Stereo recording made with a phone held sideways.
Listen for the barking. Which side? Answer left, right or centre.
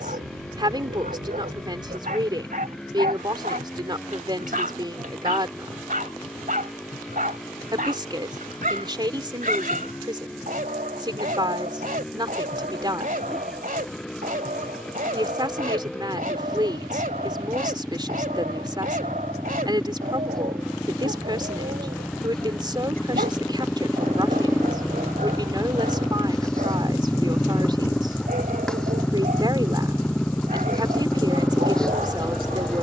right.